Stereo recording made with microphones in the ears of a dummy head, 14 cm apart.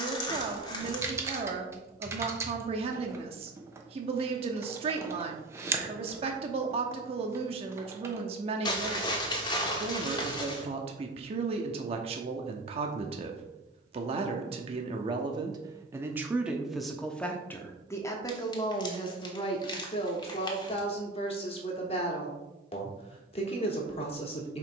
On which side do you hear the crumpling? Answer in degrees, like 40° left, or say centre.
30° left.